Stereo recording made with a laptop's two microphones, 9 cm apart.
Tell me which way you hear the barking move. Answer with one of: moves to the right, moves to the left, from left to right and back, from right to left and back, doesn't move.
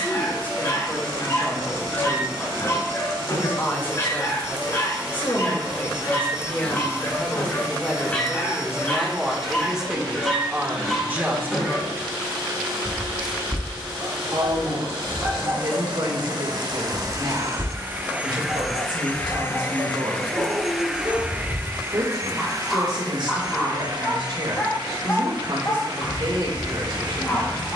from left to right and back.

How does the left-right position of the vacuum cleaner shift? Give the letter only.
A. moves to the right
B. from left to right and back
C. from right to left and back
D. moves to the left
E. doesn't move
C.